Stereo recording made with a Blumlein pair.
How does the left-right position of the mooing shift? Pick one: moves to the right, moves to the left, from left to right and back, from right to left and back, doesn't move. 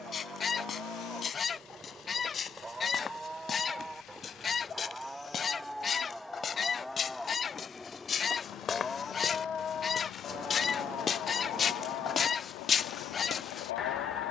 moves to the left.